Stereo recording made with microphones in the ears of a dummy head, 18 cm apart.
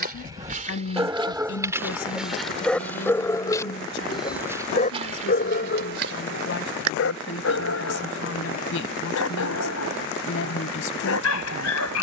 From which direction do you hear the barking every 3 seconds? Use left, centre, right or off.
centre, left, left, left.